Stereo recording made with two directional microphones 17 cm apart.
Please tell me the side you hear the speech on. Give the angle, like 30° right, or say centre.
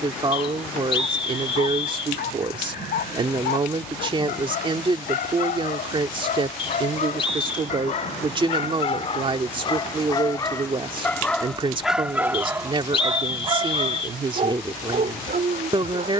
30° right.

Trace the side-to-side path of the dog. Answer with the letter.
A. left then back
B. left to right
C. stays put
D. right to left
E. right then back
B.